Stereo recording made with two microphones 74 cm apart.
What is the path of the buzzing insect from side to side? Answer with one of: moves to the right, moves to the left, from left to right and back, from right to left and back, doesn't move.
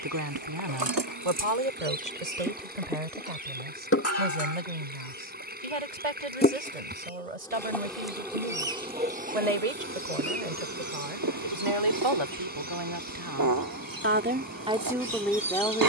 from right to left and back.